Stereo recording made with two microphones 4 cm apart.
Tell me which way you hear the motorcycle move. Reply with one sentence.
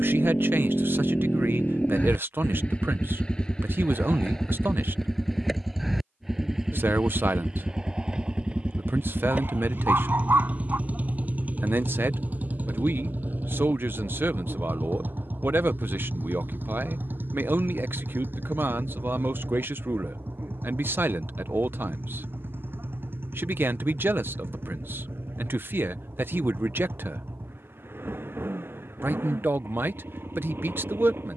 In this clip you hear the motorcycle travel towards the right.